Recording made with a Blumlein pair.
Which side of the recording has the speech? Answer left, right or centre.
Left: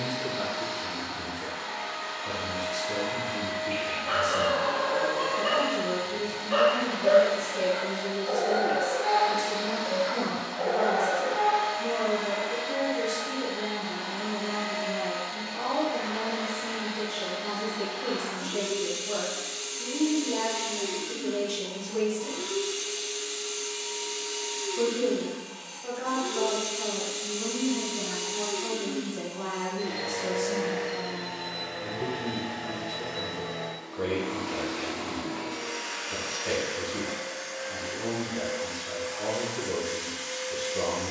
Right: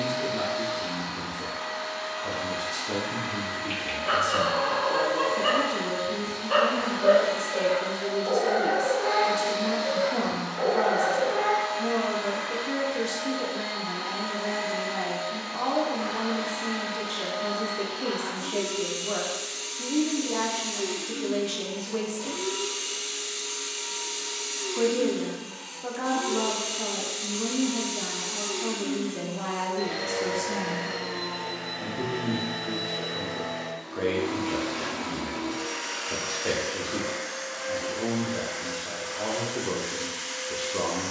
right.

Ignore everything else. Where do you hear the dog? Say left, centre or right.
right.